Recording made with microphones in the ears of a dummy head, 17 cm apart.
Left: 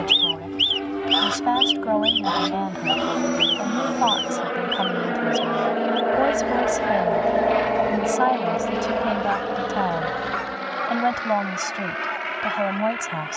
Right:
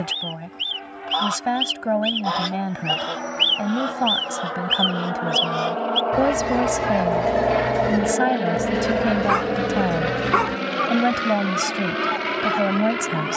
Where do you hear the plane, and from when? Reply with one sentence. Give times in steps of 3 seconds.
You can hear the plane on the left from 0 s, in the centre from 6 s and on the right from 9 s.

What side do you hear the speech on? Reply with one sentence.
You can hear the speech on the right.